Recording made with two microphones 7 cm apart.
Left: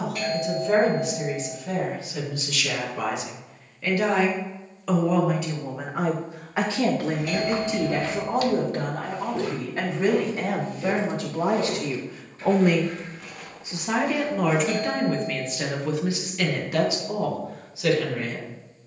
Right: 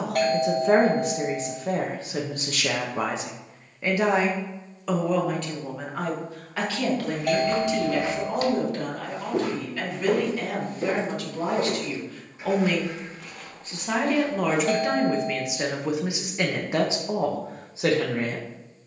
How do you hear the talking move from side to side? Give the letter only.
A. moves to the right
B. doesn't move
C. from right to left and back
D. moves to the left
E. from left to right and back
C.